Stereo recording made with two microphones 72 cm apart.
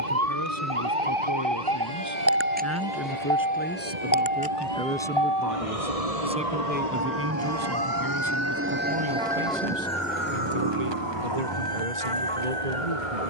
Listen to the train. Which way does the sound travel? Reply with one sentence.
You can hear the train move to the left.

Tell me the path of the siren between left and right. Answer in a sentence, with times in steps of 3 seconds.
You can hear the siren on the right from 0 s and on the left from 3 s.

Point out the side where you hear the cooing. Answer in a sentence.
You can hear the cooing on the right.